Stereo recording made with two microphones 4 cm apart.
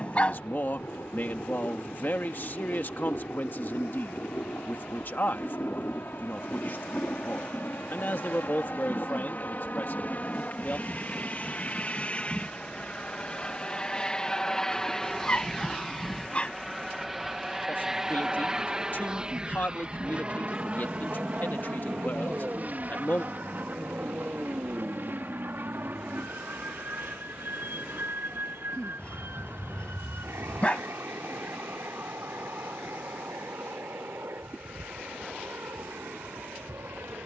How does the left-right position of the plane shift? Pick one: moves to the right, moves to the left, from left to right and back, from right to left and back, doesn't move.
moves to the right.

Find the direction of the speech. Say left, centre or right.
left.